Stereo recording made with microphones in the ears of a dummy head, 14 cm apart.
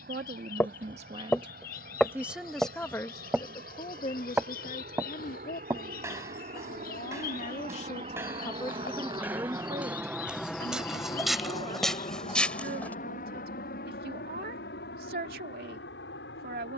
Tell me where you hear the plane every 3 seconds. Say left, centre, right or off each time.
right, right, right, centre, left, left.